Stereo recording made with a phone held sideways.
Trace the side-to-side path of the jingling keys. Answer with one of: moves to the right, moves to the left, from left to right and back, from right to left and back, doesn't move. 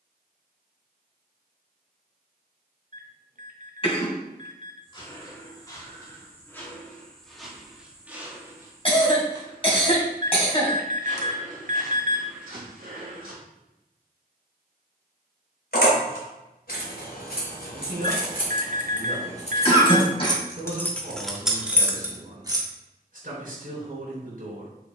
moves to the right.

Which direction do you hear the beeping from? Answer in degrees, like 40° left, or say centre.
60° right.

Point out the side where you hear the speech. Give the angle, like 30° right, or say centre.
60° right.